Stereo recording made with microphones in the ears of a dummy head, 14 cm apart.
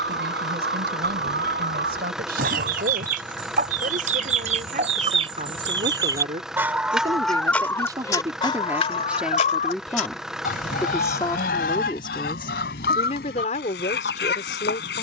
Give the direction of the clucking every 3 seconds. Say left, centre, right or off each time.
right, right, centre, left, left.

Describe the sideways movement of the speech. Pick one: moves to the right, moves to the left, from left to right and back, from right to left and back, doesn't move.
moves to the left.